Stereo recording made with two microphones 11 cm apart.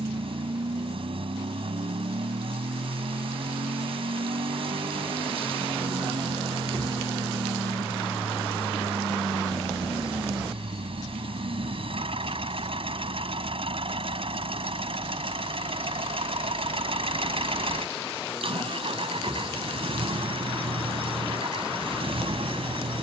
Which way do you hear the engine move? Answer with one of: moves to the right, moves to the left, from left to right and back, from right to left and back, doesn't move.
doesn't move.